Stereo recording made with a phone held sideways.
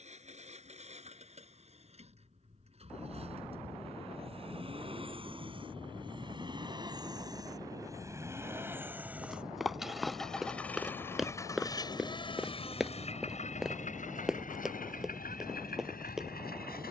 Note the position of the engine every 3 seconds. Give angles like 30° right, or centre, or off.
50° right, 40° right, 20° right, 10° left, 50° left, 70° left.